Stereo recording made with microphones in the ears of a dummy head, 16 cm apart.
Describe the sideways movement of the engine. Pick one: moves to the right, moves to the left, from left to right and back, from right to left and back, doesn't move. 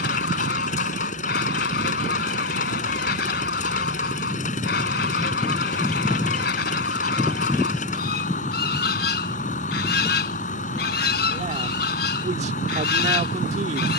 doesn't move.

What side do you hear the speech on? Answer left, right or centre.
right.